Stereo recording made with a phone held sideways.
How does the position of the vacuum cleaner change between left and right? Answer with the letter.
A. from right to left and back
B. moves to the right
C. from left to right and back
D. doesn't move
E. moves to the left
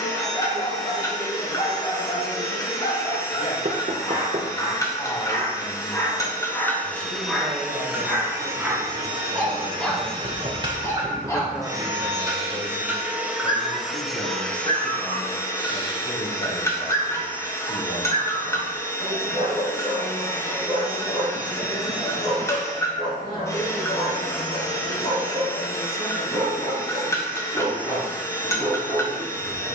C.